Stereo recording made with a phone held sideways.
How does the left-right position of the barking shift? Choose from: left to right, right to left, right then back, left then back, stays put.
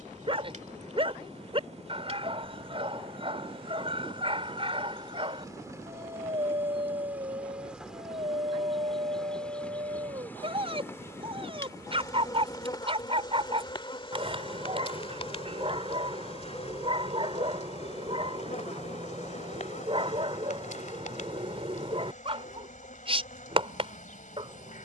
stays put.